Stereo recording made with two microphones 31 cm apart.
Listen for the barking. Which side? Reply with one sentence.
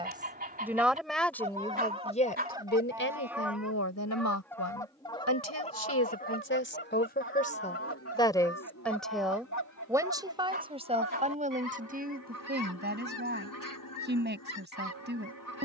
In this clip you hear the barking on the right.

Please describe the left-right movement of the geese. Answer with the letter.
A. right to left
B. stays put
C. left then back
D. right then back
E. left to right
A.